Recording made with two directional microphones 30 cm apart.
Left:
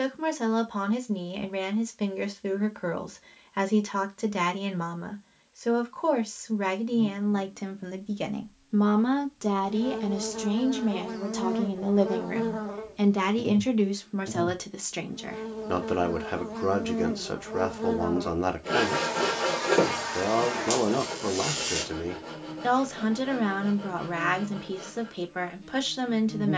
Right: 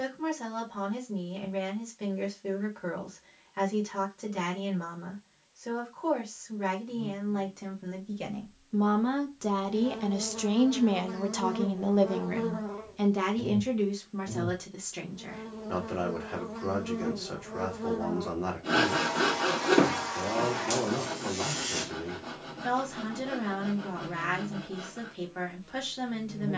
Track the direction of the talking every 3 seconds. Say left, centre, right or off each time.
left, left, left, centre, left, left, left, left, left.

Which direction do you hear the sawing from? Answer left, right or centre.
centre.